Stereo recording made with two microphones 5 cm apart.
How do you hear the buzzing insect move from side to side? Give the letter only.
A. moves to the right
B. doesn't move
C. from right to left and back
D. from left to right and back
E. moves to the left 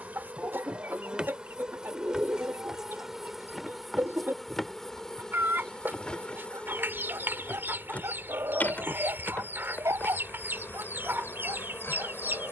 E.